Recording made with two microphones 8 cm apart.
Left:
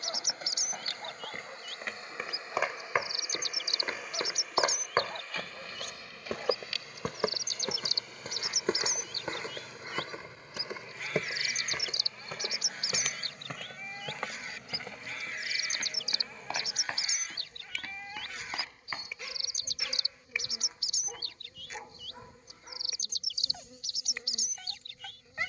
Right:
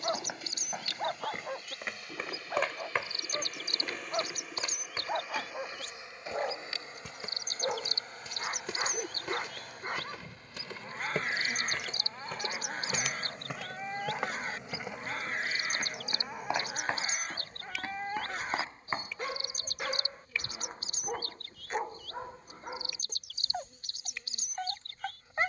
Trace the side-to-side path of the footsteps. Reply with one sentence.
In this clip you hear the footsteps move from right to left and back again.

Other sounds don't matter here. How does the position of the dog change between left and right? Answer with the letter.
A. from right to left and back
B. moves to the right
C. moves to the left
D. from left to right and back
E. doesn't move
E.